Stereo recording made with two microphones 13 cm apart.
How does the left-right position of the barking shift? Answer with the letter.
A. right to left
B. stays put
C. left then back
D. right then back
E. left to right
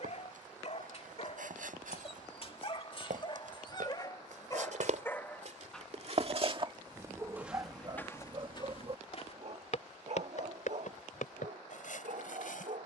E.